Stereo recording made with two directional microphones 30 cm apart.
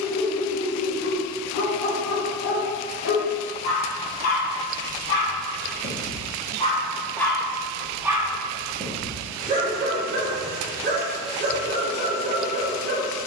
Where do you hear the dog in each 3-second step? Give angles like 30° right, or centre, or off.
70° left, 40° left, centre, 30° right, 30° right.